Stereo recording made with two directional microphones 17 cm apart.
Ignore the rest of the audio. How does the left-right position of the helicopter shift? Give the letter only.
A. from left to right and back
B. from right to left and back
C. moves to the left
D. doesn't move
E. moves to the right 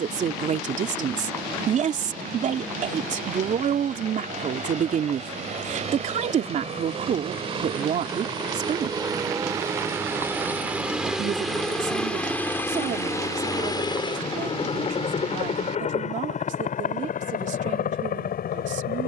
C.